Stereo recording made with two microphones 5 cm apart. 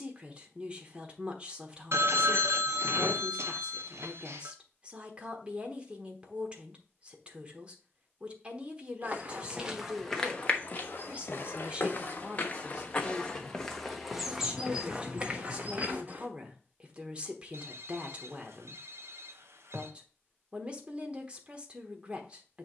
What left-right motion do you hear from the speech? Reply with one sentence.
You can hear the speech stay in one place.